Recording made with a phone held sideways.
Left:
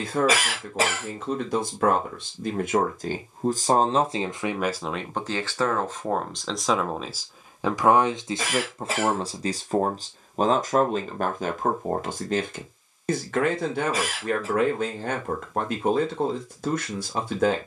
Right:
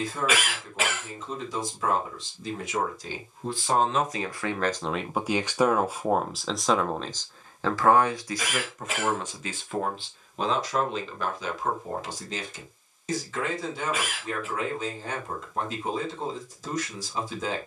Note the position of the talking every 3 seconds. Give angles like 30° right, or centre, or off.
70° left, 10° left, 10° left, 50° left, 60° left, 70° left.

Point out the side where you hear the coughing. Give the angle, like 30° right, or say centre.
40° left.